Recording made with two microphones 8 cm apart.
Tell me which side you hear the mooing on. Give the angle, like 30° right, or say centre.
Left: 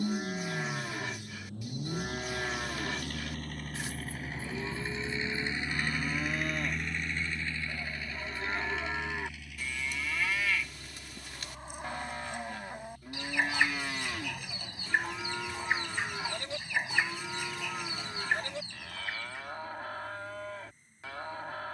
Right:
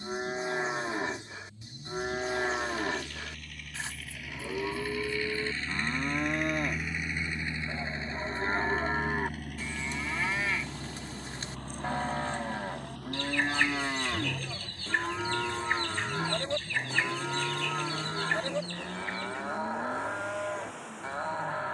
30° right.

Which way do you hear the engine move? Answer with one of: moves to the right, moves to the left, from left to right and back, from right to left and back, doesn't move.
moves to the right.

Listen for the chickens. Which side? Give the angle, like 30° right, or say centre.
10° left.